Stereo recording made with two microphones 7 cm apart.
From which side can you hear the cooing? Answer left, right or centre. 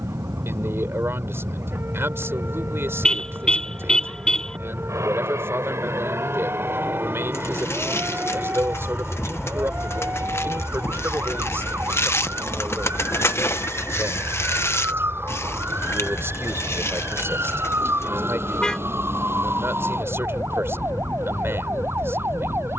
left.